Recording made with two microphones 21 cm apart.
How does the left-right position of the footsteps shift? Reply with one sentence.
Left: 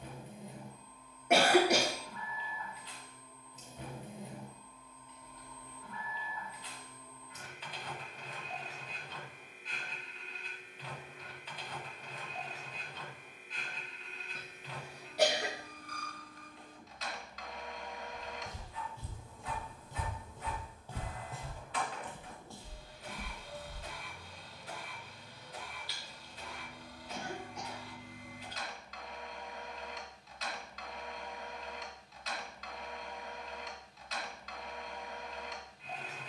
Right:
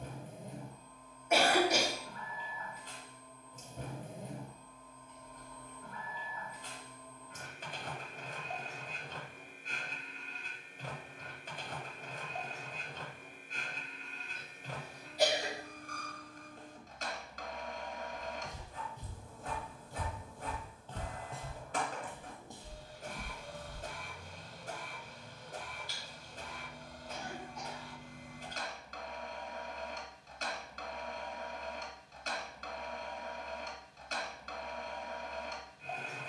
You can hear the footsteps go left and come back.